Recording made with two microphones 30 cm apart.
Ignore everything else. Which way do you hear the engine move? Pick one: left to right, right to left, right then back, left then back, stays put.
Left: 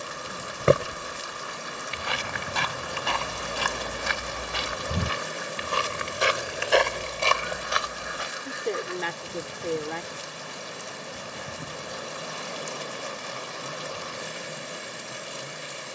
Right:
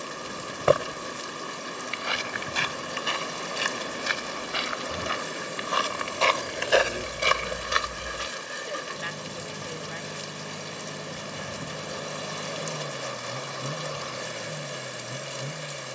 stays put.